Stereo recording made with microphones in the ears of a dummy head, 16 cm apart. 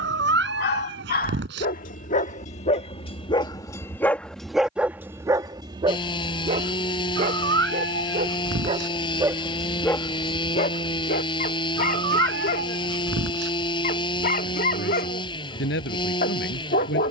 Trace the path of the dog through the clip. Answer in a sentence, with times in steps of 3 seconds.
You can hear the dog on the left from 0 s, in the centre from 3 s, on the right from 6 s and on the left from 9 s.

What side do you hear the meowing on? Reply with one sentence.
In this clip you hear the meowing on the right.